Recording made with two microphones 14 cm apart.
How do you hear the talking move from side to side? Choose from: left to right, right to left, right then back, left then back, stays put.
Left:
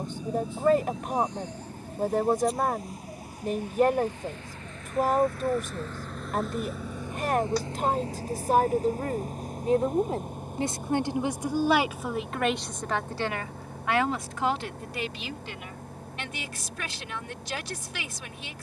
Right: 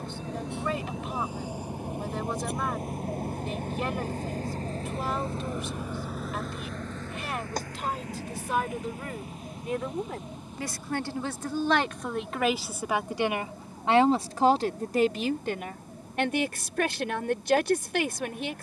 left to right.